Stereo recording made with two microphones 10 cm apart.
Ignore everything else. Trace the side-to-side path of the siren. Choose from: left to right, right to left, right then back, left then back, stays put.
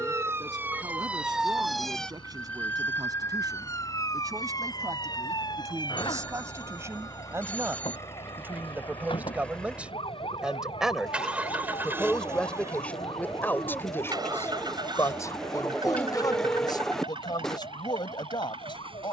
right to left.